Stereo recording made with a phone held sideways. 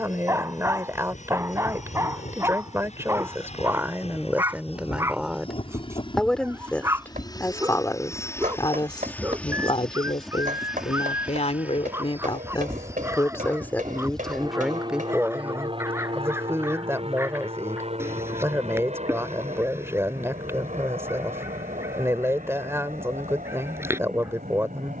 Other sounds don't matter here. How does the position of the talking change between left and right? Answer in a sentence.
You can hear the talking move from right to left and back again.